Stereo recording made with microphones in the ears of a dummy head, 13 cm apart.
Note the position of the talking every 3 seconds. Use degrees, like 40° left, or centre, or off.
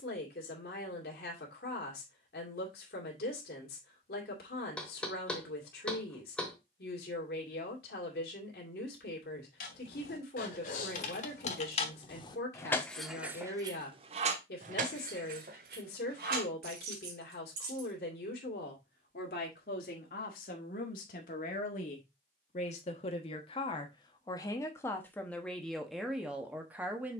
80° left, 80° left, 80° left, 80° left, 80° left, 80° left, 70° left, 50° left, centre.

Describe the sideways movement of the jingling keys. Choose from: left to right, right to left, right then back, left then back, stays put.
left to right.